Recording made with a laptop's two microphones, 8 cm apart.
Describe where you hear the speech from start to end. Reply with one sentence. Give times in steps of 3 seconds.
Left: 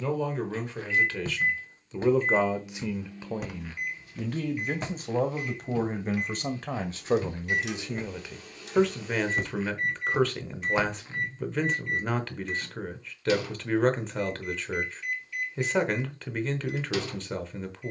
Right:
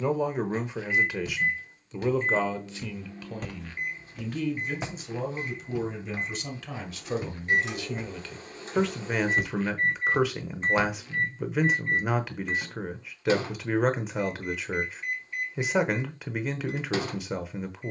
In this clip you hear the speech in the centre from 0 s, on the left from 3 s and in the centre from 9 s.